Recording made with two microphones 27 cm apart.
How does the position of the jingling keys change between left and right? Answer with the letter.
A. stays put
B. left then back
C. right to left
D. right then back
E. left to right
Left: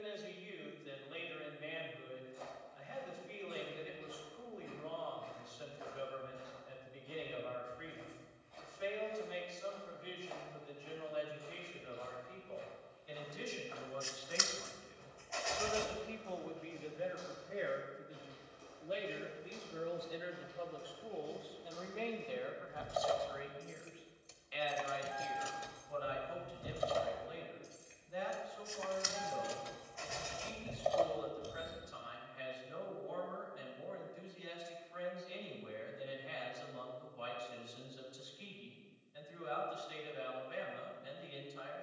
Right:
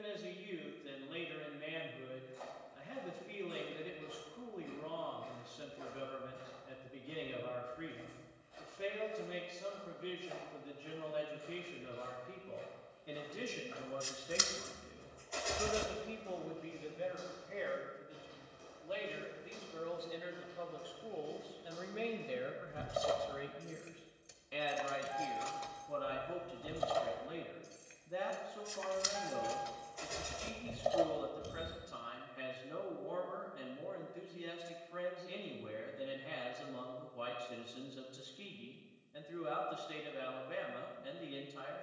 B.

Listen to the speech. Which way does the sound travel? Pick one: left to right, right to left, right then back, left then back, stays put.
left then back.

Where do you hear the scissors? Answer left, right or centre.
right.